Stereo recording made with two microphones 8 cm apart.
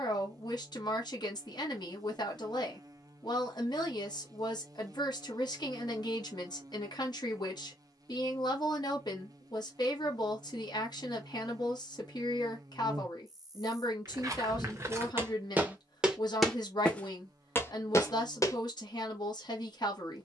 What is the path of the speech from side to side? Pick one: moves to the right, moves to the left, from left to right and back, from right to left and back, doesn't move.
doesn't move.